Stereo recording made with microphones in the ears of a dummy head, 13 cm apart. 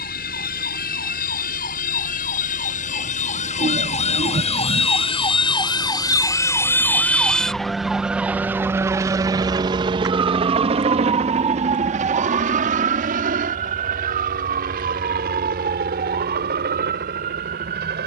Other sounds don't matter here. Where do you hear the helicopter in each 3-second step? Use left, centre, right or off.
left, left, centre, right, right, right.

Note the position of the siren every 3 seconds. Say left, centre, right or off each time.
left, left, centre, right, right, right.